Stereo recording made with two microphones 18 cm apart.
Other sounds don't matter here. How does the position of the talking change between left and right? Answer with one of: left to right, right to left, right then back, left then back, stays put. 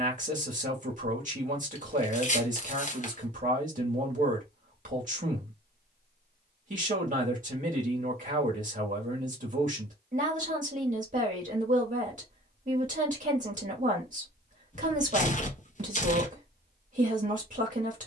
stays put.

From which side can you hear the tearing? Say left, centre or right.
left.